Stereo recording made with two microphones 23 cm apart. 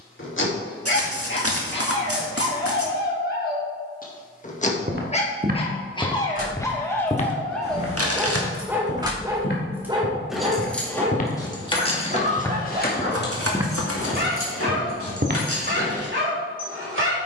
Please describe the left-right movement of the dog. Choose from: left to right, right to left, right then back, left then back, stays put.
left to right.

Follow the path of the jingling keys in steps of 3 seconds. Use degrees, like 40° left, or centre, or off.
off, off, 30° right, centre, 50° left, 70° left.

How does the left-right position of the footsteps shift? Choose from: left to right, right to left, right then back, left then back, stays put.
left then back.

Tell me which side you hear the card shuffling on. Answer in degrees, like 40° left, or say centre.
70° right.